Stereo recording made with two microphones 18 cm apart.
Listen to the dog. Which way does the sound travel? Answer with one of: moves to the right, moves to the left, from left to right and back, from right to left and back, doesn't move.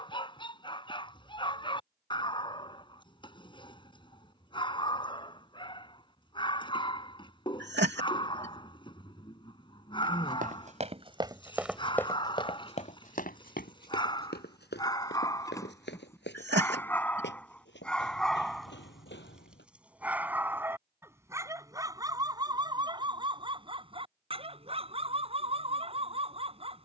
moves to the right.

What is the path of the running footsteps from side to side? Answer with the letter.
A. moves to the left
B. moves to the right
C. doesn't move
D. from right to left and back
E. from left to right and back
A.